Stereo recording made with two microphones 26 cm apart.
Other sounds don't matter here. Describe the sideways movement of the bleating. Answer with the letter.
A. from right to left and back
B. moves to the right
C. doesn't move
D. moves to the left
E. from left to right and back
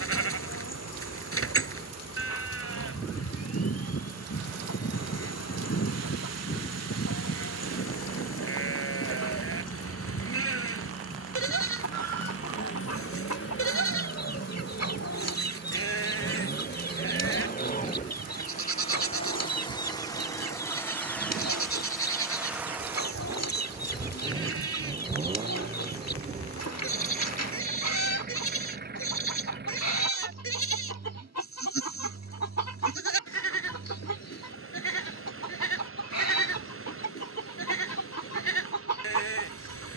C.